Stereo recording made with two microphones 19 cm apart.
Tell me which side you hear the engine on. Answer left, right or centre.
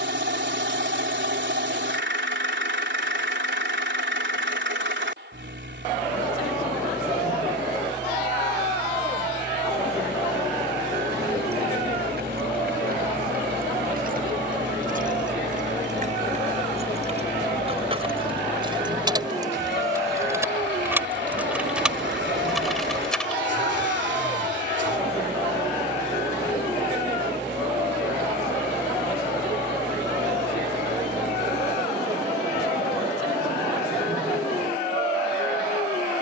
right.